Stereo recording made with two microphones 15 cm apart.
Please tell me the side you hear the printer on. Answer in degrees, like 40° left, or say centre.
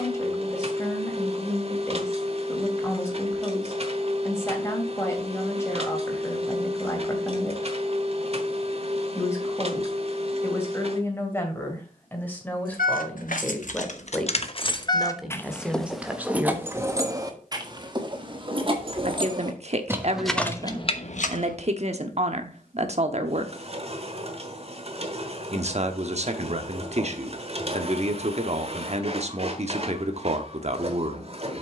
40° right.